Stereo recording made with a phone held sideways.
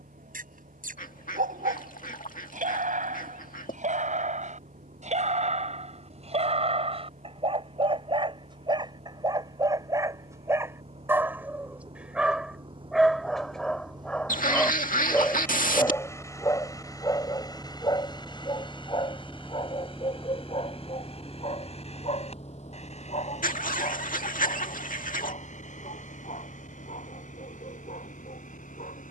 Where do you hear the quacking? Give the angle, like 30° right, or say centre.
60° left.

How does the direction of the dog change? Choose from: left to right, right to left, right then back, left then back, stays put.
right to left.